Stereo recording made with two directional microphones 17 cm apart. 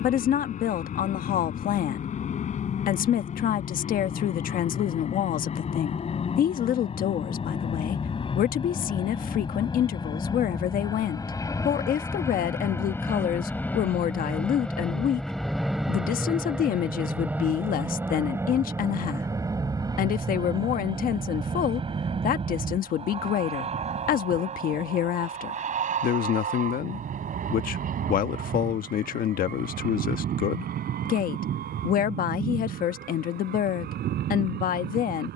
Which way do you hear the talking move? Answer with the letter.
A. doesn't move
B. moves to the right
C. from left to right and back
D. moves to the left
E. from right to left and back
A.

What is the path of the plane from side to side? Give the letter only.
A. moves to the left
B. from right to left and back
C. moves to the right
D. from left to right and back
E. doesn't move
C.